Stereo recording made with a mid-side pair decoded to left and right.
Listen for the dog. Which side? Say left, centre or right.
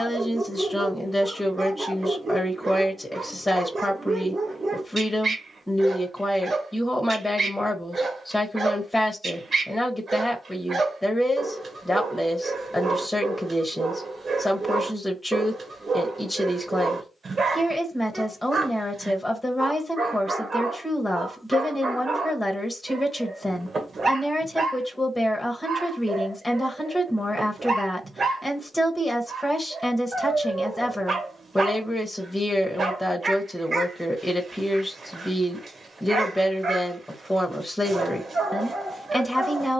right.